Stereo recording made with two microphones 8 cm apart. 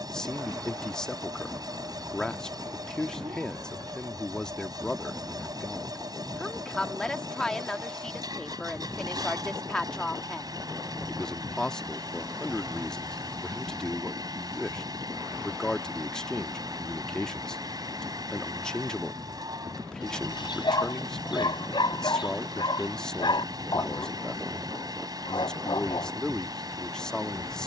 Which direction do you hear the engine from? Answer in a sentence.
You can hear the engine on the right.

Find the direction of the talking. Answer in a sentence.
In this clip you hear the talking in the centre.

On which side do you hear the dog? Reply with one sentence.
You can hear the dog on the left.